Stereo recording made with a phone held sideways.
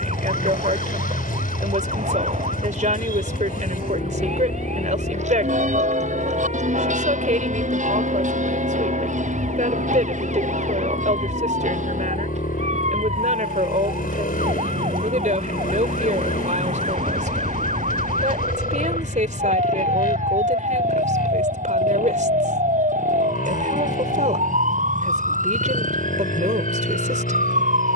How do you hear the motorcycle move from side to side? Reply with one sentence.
You can hear the motorcycle stay put.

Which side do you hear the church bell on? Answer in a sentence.
In this clip you hear the church bell on the right.